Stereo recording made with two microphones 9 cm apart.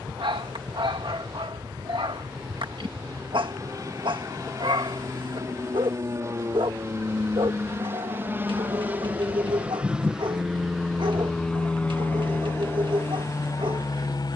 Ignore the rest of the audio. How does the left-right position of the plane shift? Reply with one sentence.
In this clip you hear the plane move to the left.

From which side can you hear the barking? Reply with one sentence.
You can hear the barking on the right.